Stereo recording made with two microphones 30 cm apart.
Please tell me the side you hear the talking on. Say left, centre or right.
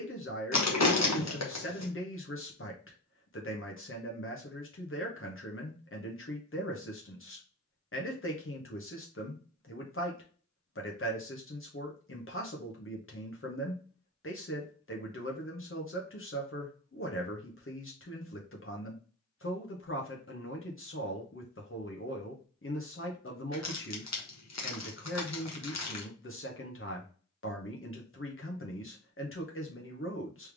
left.